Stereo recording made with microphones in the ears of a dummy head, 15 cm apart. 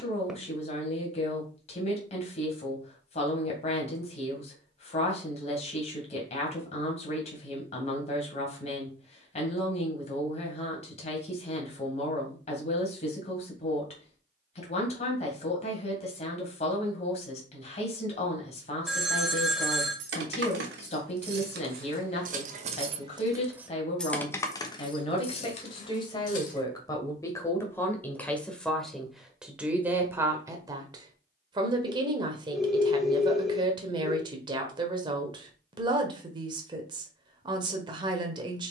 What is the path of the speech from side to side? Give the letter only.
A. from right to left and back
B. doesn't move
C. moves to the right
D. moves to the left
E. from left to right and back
C.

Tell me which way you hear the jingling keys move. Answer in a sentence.
You can hear the jingling keys travel towards the left.